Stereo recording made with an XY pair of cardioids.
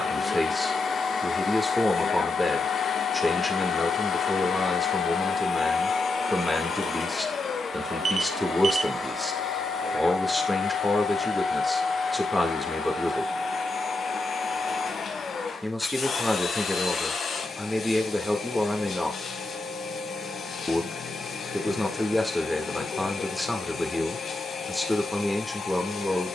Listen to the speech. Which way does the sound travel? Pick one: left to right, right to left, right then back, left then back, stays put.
stays put.